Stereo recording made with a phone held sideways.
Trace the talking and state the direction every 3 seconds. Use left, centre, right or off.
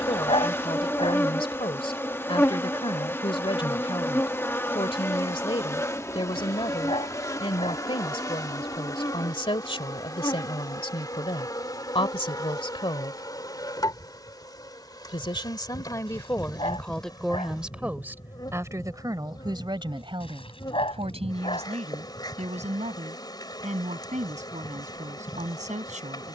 left, left, left, left, left, centre, right, right, right.